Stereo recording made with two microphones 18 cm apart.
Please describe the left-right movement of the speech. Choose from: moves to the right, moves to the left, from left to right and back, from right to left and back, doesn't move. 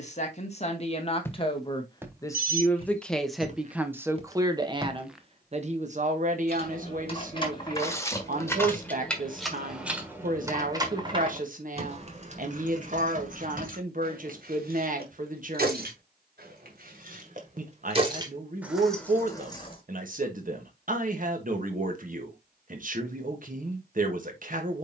moves to the right.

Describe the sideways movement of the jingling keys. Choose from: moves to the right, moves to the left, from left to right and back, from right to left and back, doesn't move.
from left to right and back.